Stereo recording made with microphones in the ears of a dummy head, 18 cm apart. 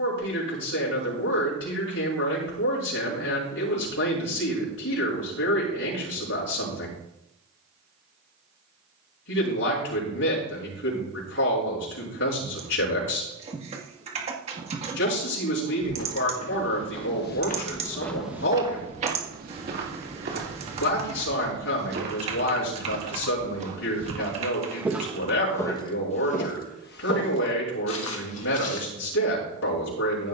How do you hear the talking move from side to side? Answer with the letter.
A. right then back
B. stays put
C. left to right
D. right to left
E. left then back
B.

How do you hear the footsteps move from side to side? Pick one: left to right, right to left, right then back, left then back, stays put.
right then back.